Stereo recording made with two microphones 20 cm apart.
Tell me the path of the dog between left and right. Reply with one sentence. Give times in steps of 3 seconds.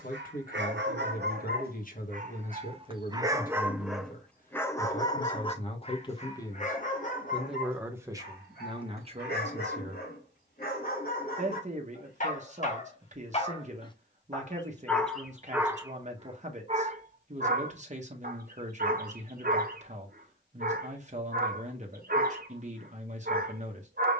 You can hear the dog on the right from 0 s, in the centre from 3 s, on the left from 6 s and on the right from 15 s.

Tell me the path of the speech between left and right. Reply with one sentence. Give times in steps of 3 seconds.
In this clip you hear the speech on the left from 0 s, in the centre from 6 s and on the right from 9 s.